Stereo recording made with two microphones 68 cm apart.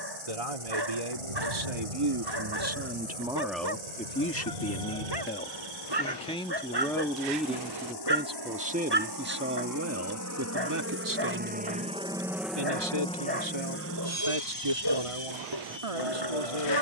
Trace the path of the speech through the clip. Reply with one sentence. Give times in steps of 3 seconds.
You can hear the speech on the right from 0 s, in the centre from 3 s and on the right from 9 s.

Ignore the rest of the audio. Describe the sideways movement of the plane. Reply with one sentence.
In this clip you hear the plane move to the left.